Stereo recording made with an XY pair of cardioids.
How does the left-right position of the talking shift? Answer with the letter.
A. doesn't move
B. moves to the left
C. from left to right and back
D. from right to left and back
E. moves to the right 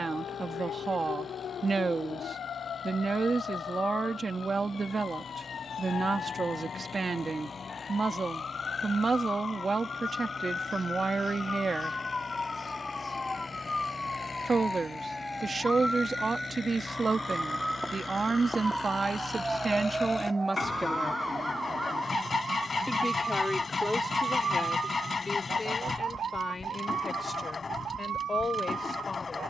B.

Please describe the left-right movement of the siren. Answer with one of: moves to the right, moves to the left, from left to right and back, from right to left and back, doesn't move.
moves to the right.